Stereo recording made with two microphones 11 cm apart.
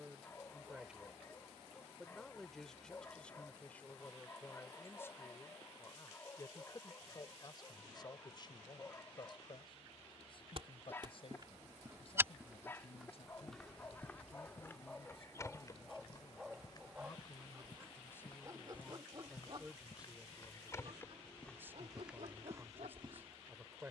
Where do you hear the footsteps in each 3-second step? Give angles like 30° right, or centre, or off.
off, off, off, 40° right, centre, 30° left, 30° left, 10° right.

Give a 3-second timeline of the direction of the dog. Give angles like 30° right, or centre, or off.
20° left, 20° left, 20° left, 20° left, 20° left, 10° right, 40° right, 60° right.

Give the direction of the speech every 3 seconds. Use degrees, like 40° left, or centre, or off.
centre, 20° left, 30° left, 50° left, 50° left, 40° left, centre, 20° right.